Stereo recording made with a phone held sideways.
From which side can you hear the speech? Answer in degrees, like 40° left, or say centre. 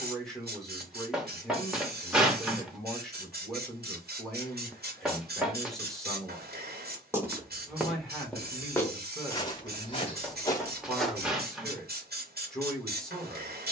centre.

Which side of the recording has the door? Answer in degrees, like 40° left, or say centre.
centre.